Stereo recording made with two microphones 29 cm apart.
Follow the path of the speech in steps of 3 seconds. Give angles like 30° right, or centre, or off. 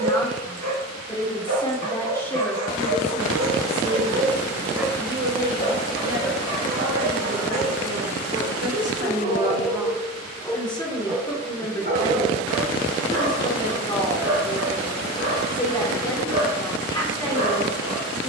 10° left, 20° right, 50° right, centre, 10° left, 10° left.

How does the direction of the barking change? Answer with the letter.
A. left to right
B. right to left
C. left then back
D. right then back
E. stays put
C.